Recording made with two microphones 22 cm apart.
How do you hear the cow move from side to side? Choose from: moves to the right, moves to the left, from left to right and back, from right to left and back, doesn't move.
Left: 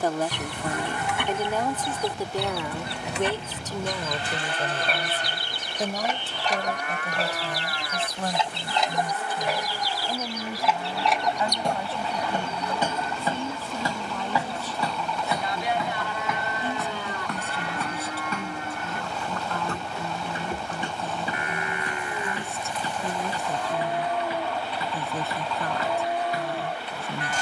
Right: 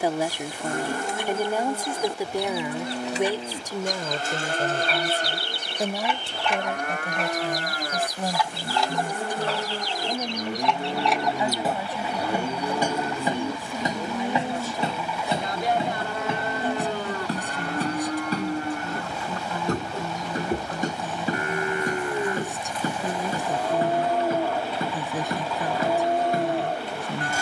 doesn't move.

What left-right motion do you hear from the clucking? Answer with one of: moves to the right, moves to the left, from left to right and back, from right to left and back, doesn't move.
moves to the right.